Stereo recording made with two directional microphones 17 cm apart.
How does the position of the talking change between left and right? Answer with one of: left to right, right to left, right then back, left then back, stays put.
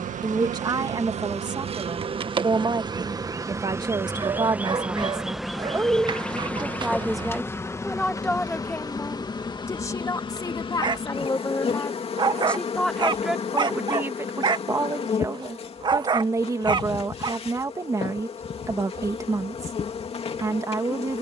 left then back.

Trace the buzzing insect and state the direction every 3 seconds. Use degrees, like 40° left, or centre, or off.
40° right, 10° right, 10° left, 30° left, 40° left, 40° left, 40° left.